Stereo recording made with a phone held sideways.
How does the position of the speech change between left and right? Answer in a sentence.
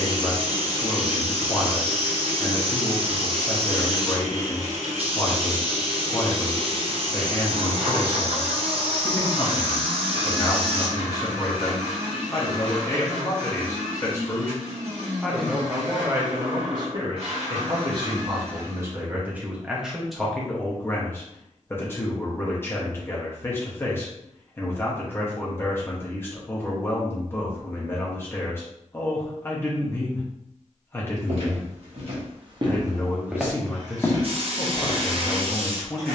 In this clip you hear the speech move from left to right and back again.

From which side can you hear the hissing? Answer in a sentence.
In this clip you hear the hissing on the right.